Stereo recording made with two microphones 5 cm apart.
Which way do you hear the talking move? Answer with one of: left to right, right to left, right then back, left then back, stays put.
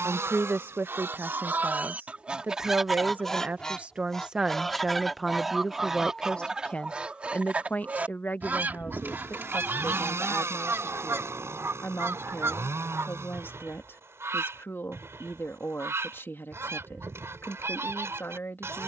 right to left.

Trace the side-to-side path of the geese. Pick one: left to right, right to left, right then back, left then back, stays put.
left then back.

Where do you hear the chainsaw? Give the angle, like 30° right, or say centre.
70° right.